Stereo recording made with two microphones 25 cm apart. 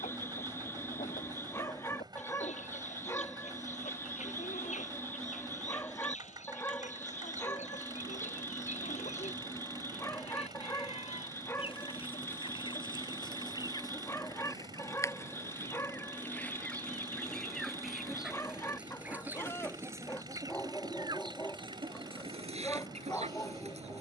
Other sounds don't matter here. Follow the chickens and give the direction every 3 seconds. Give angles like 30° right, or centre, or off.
30° left, 30° left, 30° left, 20° left, 20° left, centre, 10° right, 20° right.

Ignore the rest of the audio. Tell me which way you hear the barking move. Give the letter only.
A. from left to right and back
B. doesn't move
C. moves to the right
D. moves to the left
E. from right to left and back
B.